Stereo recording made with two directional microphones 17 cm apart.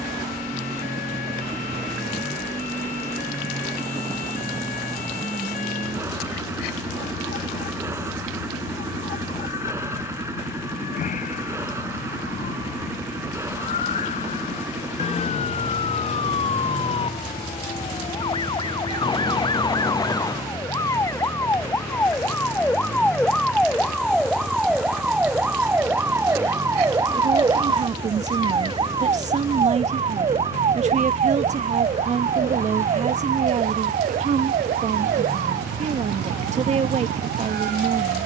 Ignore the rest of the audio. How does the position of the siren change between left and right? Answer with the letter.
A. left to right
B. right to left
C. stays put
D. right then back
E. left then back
A.